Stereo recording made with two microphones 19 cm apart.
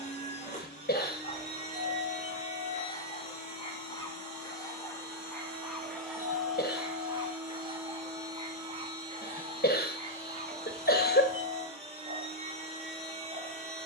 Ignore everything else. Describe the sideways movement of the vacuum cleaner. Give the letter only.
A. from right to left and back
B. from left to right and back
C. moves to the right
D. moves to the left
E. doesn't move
C.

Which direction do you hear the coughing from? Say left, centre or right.
left.